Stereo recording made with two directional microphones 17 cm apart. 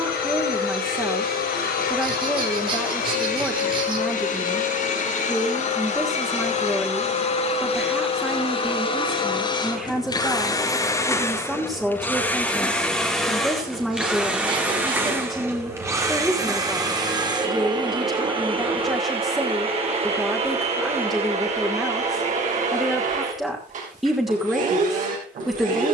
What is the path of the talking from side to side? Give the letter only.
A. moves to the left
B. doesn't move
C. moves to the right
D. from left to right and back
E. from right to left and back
B.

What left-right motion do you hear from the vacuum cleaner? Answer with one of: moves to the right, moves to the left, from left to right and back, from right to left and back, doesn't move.
moves to the right.